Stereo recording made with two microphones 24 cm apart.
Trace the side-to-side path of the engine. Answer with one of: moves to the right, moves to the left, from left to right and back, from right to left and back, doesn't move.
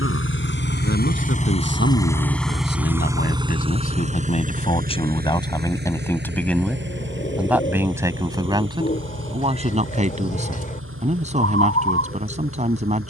moves to the right.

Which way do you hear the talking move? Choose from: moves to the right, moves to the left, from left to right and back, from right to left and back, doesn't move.
moves to the right.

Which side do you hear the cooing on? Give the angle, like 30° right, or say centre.
30° left.